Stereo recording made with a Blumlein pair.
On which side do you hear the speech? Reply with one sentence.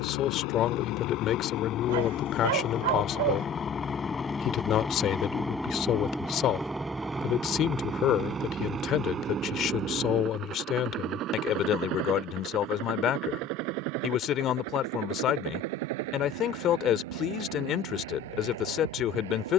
In this clip you hear the speech on the left.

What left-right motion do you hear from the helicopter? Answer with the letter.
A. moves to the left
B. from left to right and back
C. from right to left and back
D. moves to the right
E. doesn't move
D.